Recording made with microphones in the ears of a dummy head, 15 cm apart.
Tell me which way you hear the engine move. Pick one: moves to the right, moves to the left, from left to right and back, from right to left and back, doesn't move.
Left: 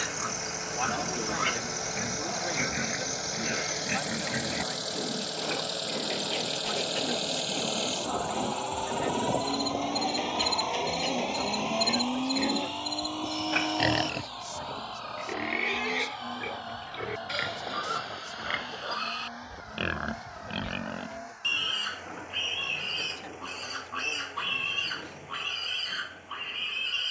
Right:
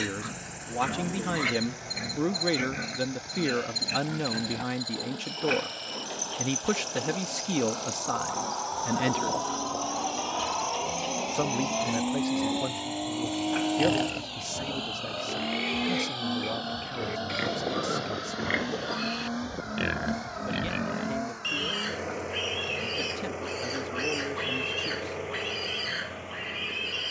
moves to the right.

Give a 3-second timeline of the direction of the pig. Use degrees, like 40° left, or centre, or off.
10° right, 10° left, 20° left, 20° left, 20° left, centre, 10° right, 10° right, 10° right.